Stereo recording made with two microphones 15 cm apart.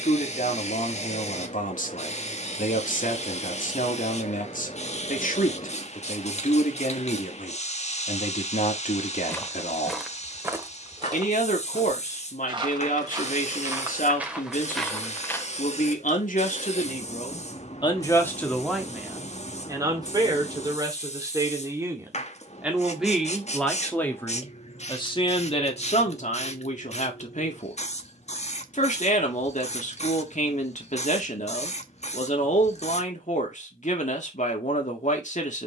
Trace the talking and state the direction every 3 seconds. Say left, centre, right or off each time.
left, left, left, left, left, left, centre, centre, left, left, left, left.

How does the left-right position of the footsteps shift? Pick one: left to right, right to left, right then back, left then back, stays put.
right then back.